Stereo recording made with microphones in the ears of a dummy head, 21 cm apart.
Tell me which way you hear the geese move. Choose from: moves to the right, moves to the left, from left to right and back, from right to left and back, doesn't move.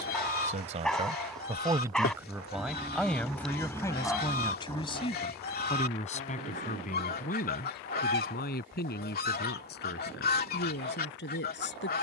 doesn't move.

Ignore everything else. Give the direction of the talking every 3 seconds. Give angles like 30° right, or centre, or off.
20° right, 20° left, 40° left, 50° left.